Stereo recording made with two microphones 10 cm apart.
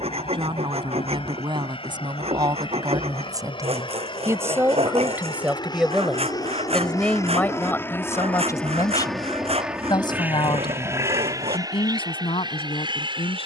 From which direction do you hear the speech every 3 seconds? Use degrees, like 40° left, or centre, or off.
50° right, 20° right, 20° left, 50° left, 60° left.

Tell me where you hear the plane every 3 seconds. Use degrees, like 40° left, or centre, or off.
70° left, 50° left, 30° left, 20° right, 50° right.